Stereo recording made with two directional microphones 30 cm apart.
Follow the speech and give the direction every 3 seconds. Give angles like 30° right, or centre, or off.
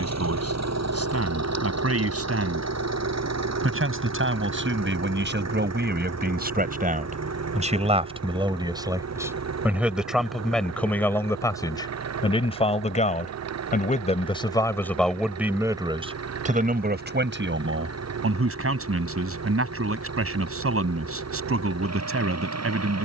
50° right, 40° right, 20° right, centre, 20° left, 20° right, 50° right, 50° right.